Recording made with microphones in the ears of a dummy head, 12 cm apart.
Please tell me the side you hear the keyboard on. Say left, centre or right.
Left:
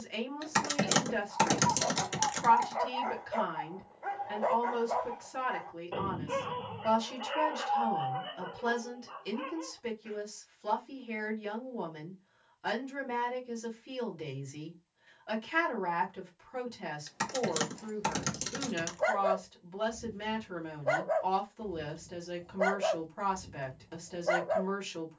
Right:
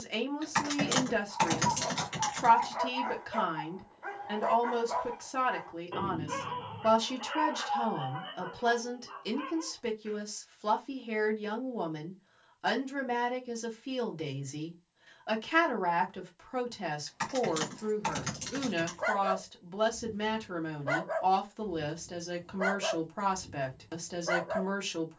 left.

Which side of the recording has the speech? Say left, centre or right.
right.